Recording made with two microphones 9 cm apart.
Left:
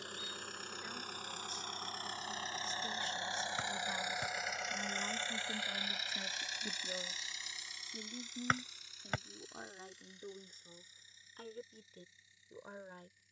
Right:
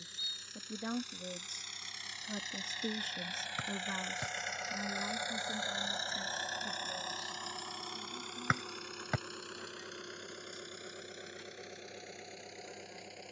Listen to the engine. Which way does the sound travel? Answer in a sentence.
In this clip you hear the engine go from the left side to the right.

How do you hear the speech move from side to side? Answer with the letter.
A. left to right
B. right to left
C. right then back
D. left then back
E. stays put
B.